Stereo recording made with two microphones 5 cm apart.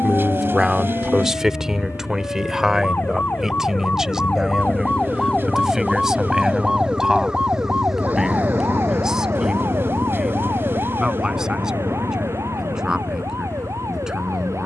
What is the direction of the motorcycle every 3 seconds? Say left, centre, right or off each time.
right, right, centre, left, left.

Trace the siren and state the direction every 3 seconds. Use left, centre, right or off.
left, left, right, right, right.